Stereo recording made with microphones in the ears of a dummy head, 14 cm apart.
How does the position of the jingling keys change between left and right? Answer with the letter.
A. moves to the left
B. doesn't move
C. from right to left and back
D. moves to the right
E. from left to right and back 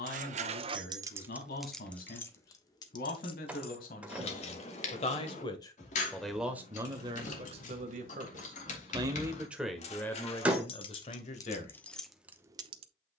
C.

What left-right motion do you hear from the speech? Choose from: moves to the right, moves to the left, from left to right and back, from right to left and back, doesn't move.
from left to right and back.